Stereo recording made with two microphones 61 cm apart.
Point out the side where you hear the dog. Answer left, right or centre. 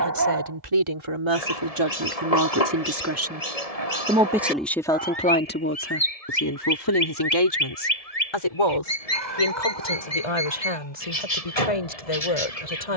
right.